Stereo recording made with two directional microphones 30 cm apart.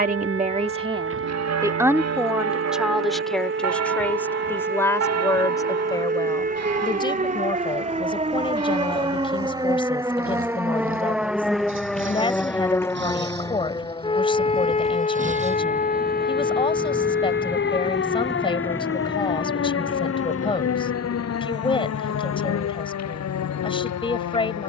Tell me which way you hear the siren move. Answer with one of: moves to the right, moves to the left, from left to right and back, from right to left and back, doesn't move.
moves to the left.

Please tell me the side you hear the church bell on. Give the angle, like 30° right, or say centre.
60° right.